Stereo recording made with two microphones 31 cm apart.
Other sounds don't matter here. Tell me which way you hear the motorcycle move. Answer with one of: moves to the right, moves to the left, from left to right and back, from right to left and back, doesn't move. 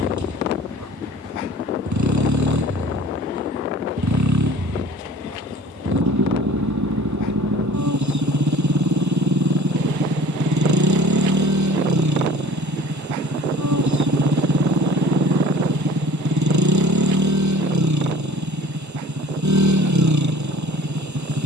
doesn't move.